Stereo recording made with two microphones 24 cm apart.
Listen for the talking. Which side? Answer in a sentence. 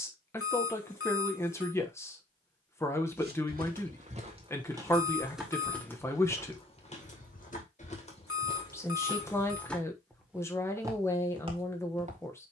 In this clip you hear the talking in the centre.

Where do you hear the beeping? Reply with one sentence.
You can hear the beeping on the left.